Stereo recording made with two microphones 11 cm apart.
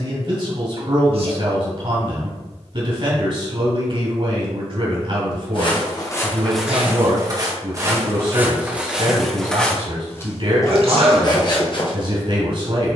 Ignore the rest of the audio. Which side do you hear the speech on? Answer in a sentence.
You can hear the speech on the right.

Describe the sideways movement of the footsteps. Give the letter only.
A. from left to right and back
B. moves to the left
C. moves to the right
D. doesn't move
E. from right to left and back
A.